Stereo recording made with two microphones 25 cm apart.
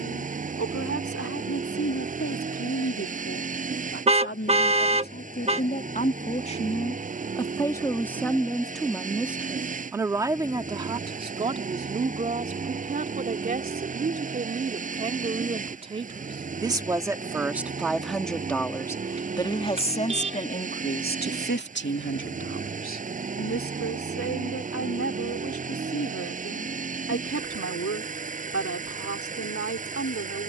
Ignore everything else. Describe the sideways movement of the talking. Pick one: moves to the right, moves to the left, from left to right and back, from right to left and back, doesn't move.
from left to right and back.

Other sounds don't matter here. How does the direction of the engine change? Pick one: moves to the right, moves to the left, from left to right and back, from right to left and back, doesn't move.
doesn't move.